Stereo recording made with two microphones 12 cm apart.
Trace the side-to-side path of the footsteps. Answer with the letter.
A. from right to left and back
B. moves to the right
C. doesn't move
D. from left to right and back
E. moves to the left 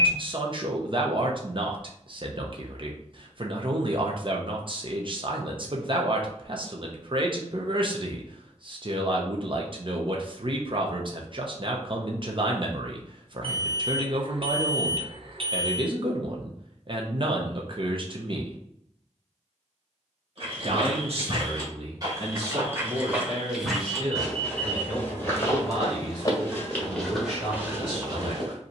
A.